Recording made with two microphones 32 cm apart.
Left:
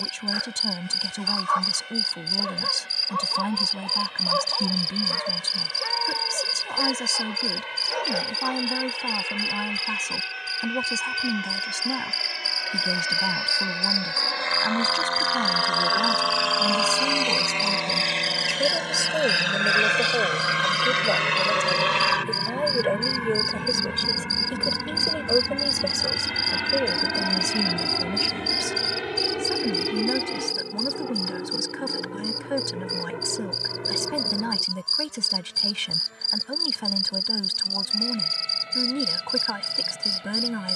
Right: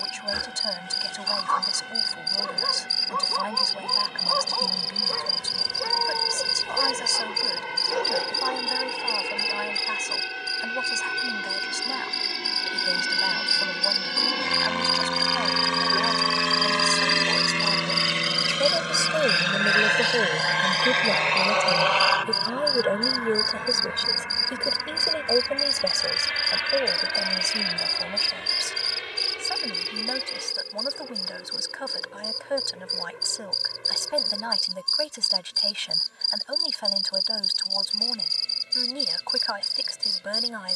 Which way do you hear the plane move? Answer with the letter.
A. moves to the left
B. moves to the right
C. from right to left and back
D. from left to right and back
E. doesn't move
A.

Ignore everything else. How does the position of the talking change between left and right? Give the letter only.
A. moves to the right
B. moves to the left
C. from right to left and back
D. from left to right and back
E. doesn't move
D.